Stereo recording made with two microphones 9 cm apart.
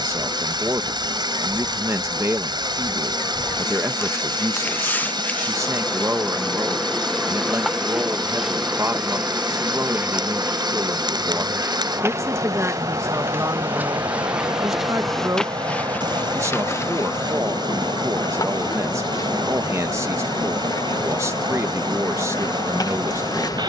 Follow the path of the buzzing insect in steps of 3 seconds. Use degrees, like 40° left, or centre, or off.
40° left, 20° left, centre, 20° right, 20° right, 30° left, 40° left, 40° left.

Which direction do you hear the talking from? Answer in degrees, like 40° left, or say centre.
30° right.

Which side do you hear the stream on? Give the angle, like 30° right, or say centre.
60° right.